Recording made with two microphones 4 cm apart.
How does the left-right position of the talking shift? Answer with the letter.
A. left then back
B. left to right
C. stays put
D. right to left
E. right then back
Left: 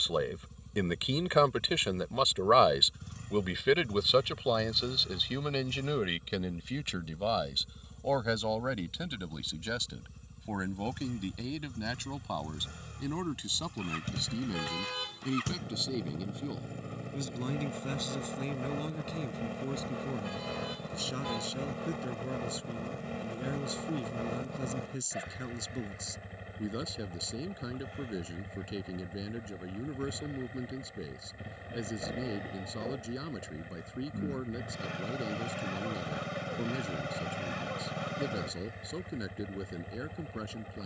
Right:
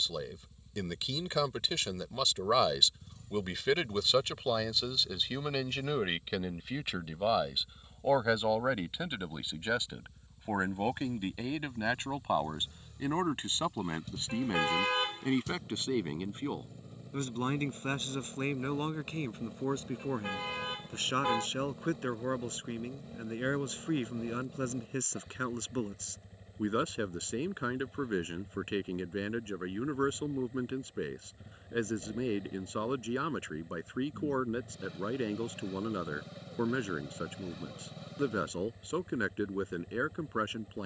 B.